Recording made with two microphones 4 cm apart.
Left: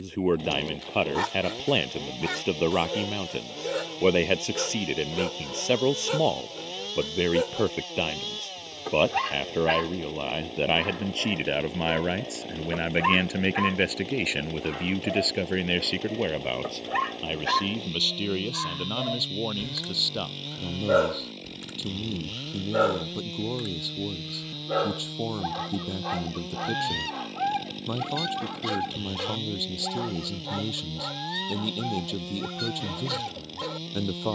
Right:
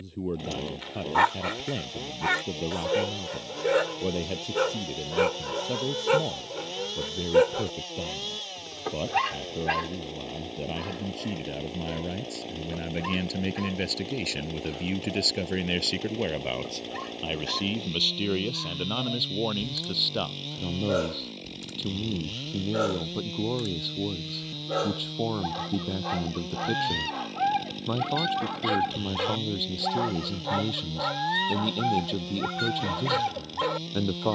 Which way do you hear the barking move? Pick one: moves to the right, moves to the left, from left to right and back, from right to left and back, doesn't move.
from right to left and back.